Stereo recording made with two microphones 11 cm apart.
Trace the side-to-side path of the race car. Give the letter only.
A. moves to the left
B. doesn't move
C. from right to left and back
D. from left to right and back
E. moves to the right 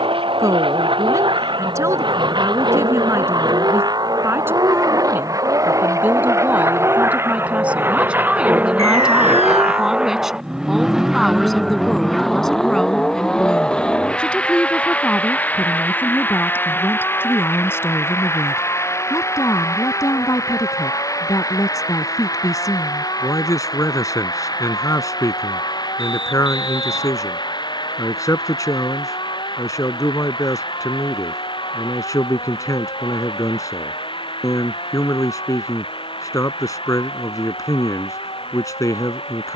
A.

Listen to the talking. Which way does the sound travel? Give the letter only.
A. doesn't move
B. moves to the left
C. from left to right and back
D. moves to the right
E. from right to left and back
B.